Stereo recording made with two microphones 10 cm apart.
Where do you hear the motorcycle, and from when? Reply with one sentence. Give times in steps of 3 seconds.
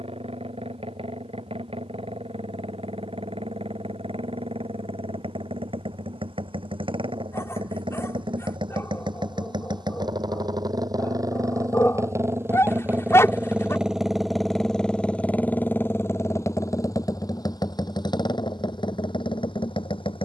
You can hear the motorcycle on the right from 0 s, in the centre from 12 s and on the left from 15 s.